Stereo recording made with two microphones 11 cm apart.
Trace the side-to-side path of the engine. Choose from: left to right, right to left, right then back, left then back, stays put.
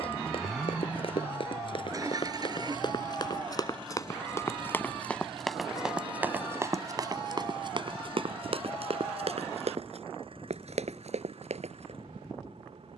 left to right.